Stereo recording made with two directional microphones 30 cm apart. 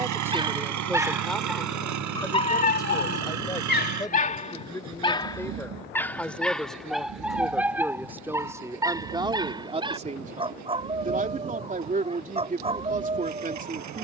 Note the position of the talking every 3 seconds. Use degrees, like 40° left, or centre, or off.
centre, 10° left, centre, 20° right, 30° right.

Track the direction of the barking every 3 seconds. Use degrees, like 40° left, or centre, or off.
10° left, 20° left, centre, 20° right, 20° right.